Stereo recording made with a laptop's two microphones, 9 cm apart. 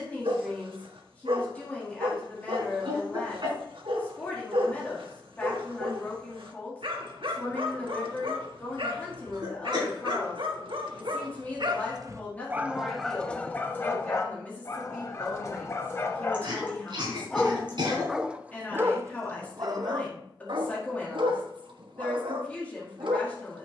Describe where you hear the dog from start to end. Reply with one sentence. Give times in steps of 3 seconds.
You can hear the dog on the right from 0 s, in the centre from 12 s, on the left from 15 s and on the right from 18 s.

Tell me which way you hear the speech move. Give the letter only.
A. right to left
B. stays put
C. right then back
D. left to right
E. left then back
B.